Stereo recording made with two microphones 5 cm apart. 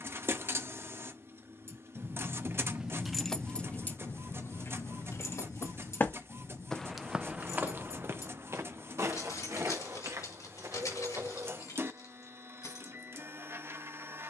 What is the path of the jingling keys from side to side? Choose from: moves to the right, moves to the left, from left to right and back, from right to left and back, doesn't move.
moves to the left.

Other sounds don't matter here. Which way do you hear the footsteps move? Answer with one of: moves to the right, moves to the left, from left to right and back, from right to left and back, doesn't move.
moves to the right.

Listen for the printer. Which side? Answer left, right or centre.
right.